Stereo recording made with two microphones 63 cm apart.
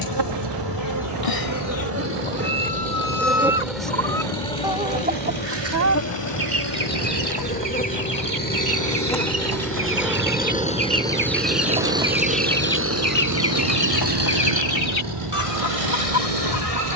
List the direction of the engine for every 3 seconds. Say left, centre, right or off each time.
left, left, left, centre, right, right.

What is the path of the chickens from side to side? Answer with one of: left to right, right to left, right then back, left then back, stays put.
right then back.